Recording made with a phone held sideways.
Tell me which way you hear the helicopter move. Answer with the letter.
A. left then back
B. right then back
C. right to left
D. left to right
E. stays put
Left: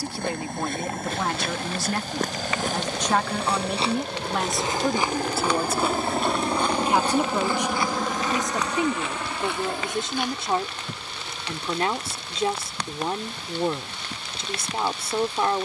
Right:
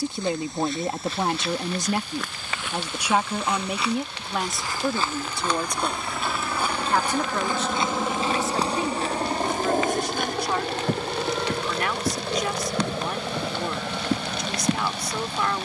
D.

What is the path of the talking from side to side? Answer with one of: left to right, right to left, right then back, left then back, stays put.
right to left.